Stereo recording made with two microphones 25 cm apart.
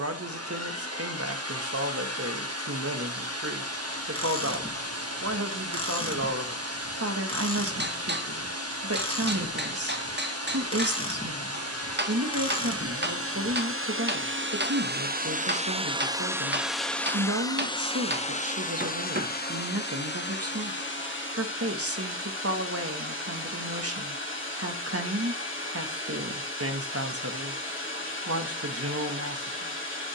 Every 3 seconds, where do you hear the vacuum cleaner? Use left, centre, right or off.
right, right, right, right, right, centre, left, left, left, left.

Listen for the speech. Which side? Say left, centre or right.
right.